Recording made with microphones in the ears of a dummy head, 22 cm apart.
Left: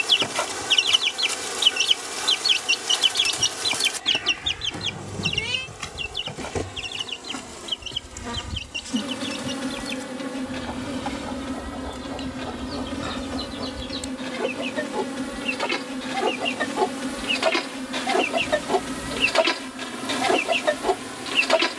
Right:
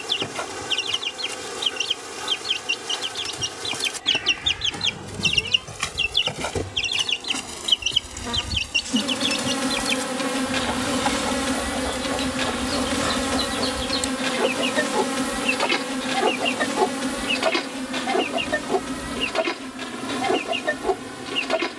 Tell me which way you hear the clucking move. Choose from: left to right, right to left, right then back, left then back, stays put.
right then back.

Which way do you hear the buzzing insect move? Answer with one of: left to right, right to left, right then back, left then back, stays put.
right then back.